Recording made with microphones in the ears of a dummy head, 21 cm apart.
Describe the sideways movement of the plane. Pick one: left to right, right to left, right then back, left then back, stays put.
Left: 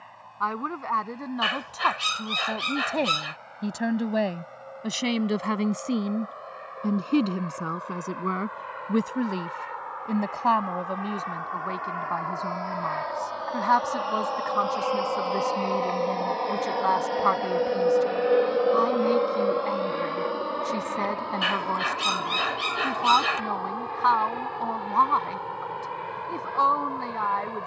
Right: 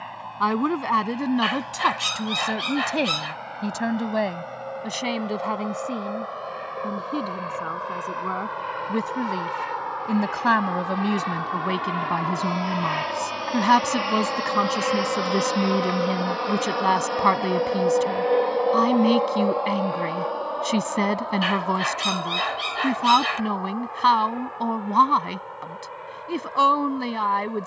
right to left.